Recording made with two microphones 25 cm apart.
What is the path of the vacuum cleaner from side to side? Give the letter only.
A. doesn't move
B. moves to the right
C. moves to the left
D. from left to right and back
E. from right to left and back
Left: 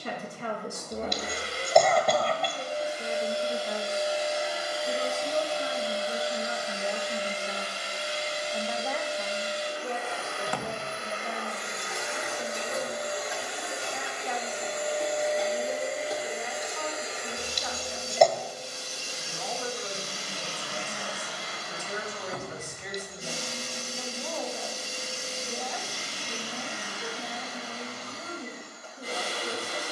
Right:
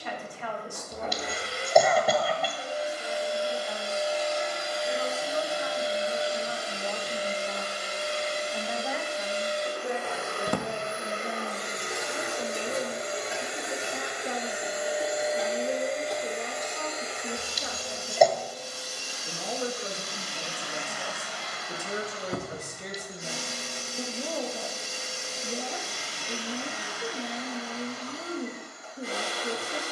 D.